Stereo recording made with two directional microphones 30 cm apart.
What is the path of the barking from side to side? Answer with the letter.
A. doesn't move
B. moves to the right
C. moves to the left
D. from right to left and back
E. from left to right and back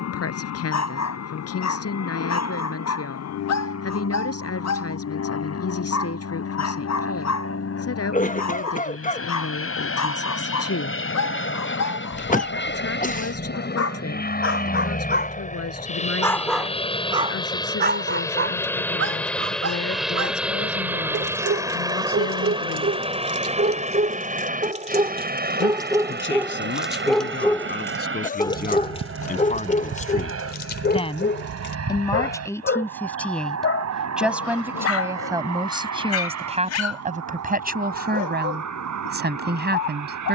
E.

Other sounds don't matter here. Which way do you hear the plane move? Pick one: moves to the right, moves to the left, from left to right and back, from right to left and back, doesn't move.
moves to the right.